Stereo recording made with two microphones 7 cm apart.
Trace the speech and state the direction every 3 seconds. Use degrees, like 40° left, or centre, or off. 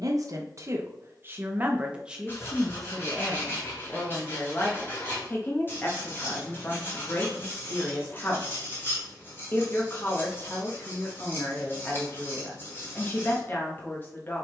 20° right, 20° left, 30° left, 30° left, 30° left.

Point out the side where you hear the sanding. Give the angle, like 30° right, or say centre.
30° left.